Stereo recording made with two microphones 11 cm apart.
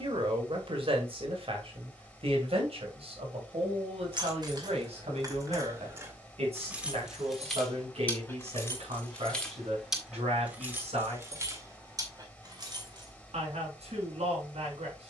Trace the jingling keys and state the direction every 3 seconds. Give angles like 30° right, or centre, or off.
off, 40° right, centre, 10° right, 40° right.